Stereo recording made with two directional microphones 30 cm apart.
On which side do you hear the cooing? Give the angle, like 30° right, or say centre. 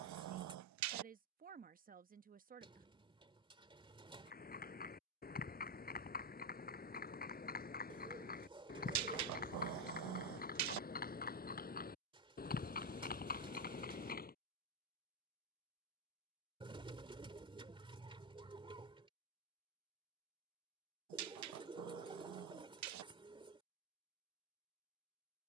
20° right.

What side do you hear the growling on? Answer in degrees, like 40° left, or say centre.
70° right.